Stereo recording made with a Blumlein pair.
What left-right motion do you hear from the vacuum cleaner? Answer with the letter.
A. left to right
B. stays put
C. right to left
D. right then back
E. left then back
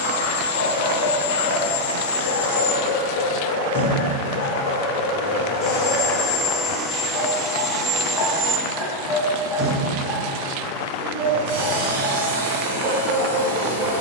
A.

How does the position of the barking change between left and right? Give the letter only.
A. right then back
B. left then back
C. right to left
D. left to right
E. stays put
D.